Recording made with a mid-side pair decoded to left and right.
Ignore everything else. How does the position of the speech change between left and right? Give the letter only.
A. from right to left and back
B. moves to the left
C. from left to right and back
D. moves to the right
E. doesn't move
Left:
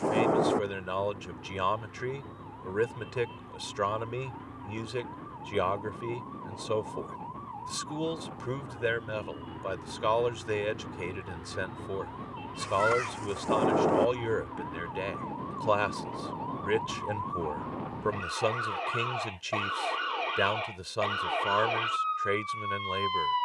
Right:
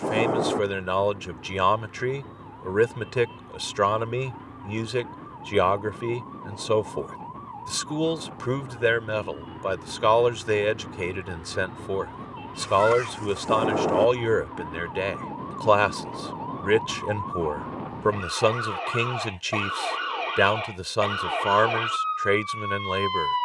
E.